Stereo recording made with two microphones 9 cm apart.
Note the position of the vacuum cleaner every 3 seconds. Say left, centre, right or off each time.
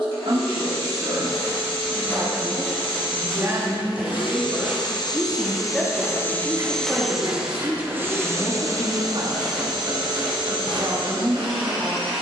left, left, centre, right.